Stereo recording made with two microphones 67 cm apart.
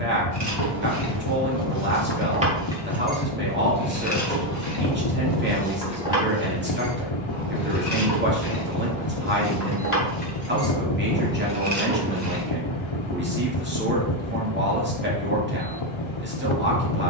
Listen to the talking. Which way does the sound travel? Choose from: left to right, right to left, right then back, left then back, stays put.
stays put.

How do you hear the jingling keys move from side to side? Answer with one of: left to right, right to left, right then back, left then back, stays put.
left then back.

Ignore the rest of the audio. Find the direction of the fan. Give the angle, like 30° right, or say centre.
50° left.